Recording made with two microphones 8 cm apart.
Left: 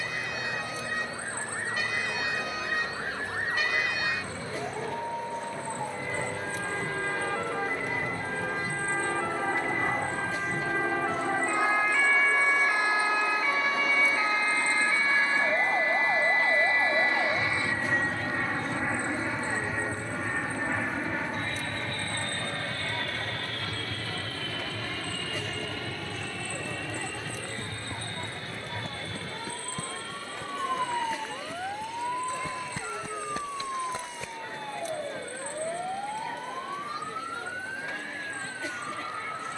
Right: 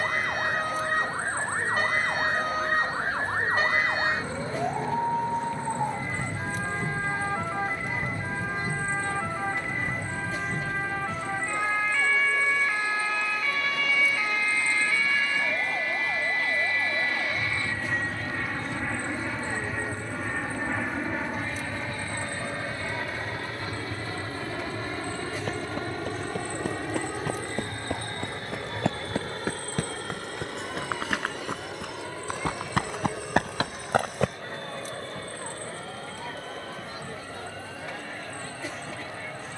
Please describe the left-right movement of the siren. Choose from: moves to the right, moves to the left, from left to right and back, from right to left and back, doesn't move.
moves to the left.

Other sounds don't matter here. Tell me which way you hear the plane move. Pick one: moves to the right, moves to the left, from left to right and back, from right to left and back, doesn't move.
moves to the right.